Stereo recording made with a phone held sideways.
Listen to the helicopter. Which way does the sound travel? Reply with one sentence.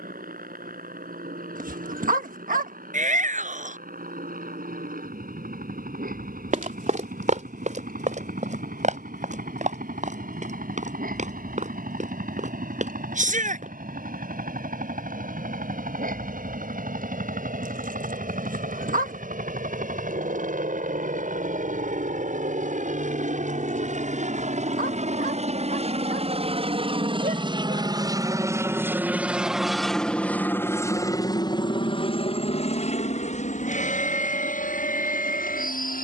You can hear the helicopter go from the right side to the left.